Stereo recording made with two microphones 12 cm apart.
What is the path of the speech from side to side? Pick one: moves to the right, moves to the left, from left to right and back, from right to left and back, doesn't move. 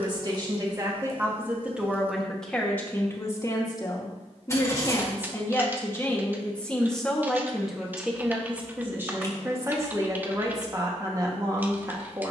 from right to left and back.